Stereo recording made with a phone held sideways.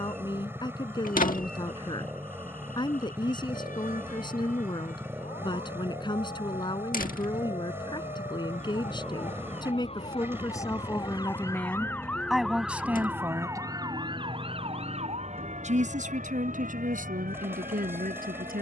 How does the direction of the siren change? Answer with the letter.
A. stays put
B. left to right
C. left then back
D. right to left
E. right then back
B.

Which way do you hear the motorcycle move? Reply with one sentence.
In this clip you hear the motorcycle stay put.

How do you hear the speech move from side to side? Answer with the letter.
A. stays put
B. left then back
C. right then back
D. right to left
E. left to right
E.